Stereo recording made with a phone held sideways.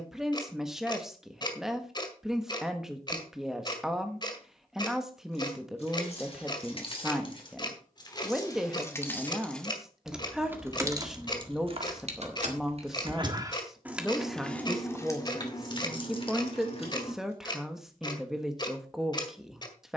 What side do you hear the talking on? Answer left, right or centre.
centre.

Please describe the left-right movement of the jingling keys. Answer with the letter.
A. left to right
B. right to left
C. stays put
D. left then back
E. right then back
E.